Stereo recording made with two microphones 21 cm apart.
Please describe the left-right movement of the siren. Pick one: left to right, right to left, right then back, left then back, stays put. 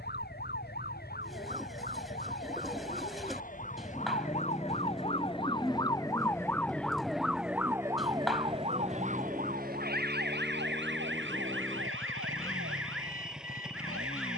left to right.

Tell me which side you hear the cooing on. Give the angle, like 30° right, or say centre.
centre.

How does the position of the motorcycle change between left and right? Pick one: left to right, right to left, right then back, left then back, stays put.
stays put.